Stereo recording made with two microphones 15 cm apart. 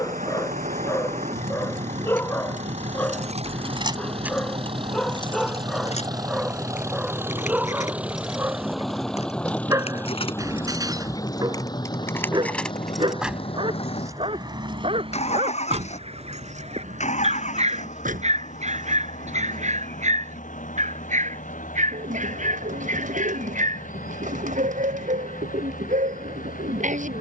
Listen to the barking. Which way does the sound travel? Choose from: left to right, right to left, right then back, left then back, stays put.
left to right.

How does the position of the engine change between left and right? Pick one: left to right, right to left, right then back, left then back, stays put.
right to left.